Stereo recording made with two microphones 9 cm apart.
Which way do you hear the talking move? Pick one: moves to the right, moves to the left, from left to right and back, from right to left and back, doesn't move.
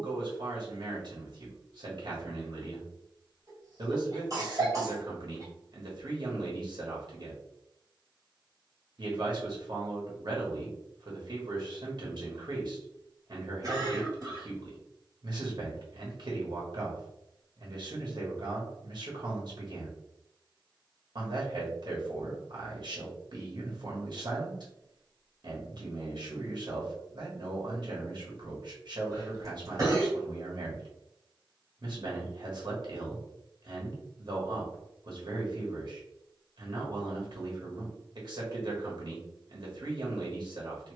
doesn't move.